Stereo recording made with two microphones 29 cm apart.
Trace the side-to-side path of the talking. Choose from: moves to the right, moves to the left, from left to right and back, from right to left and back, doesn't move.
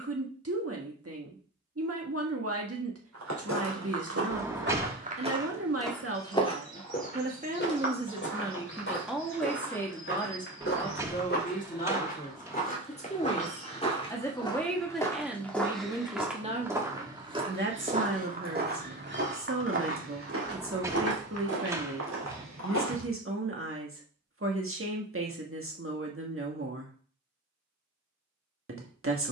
from right to left and back.